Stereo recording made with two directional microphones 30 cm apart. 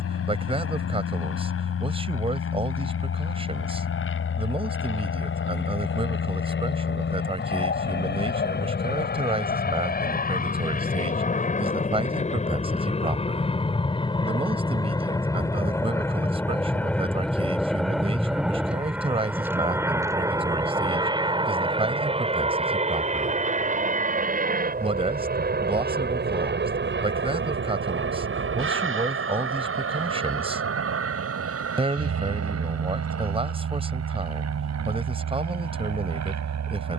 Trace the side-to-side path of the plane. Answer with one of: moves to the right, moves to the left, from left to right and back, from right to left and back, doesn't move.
moves to the right.